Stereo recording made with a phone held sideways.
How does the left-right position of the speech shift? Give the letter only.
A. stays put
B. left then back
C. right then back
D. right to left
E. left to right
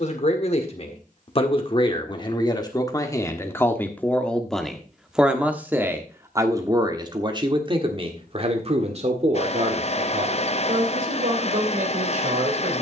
E.